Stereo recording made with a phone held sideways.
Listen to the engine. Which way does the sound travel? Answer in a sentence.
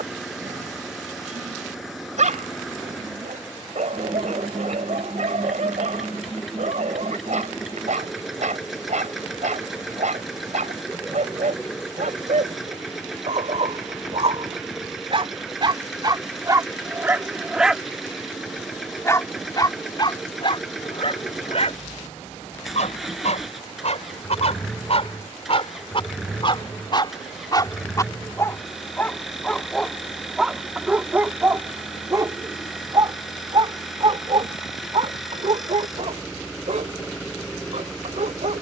You can hear the engine stay put.